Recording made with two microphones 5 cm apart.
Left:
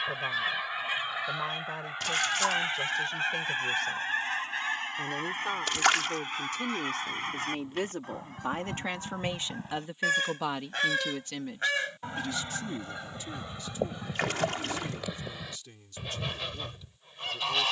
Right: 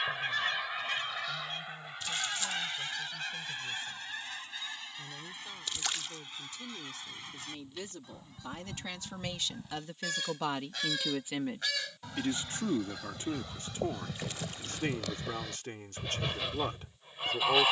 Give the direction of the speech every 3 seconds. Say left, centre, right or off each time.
left, left, left, centre, right, right.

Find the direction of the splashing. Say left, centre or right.
left.